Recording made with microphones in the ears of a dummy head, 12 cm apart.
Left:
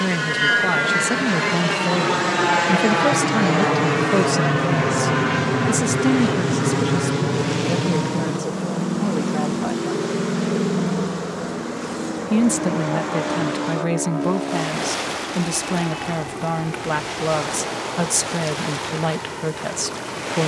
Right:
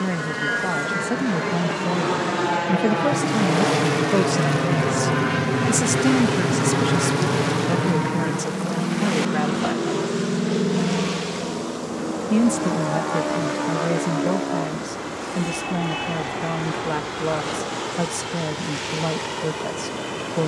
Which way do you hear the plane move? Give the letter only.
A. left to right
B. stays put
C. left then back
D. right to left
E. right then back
A.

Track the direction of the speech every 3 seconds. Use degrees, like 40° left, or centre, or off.
50° left, 10° left, 20° right, 40° right, 40° left, 60° left, 60° left.